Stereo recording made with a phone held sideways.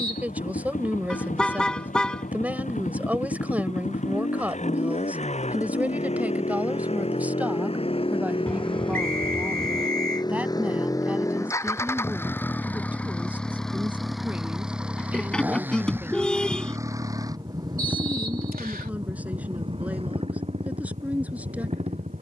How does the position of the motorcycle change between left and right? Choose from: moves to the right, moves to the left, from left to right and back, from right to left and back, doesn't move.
moves to the right.